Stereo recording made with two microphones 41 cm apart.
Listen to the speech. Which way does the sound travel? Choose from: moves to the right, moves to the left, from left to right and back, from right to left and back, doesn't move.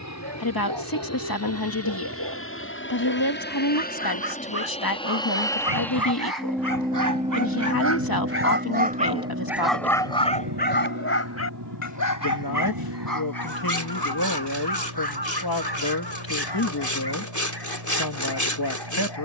doesn't move.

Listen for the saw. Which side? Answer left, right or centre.
left.